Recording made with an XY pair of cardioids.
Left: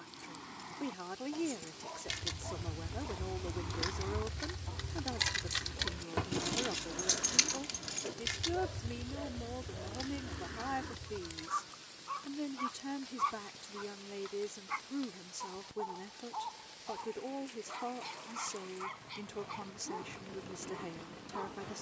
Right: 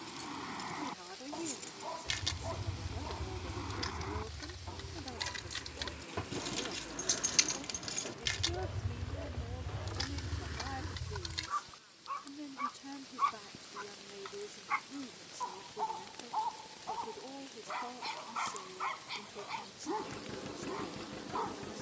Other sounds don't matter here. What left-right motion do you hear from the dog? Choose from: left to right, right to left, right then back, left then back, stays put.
left then back.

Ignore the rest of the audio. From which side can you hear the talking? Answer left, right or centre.
left.